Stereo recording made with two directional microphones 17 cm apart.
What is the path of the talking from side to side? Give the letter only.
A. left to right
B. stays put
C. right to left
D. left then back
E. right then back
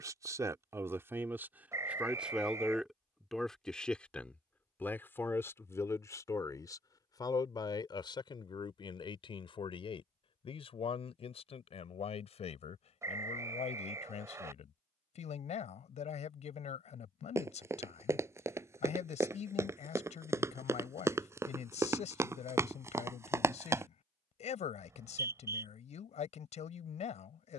C.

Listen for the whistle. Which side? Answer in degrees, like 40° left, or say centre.
20° right.